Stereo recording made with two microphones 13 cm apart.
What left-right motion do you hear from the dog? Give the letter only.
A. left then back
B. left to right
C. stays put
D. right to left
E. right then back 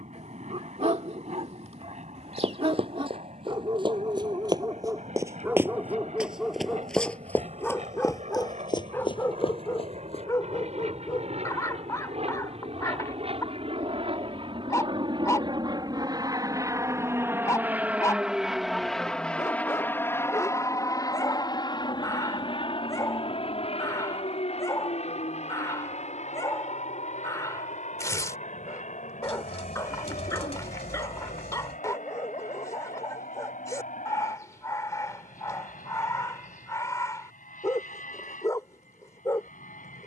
D.